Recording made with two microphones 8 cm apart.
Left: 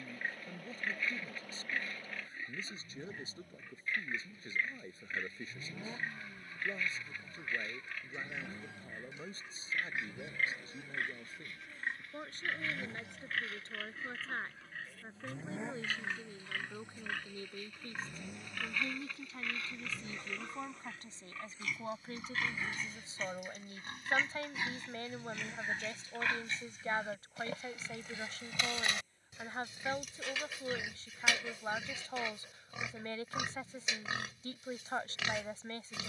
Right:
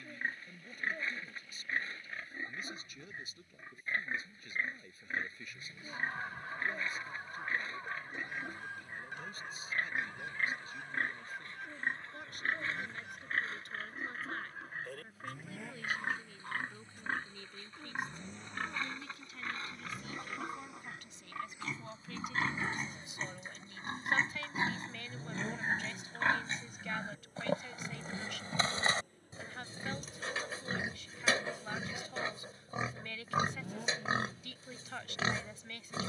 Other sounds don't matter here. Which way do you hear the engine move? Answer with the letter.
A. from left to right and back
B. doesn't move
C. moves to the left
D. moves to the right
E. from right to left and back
D.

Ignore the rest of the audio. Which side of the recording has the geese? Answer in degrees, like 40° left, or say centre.
60° right.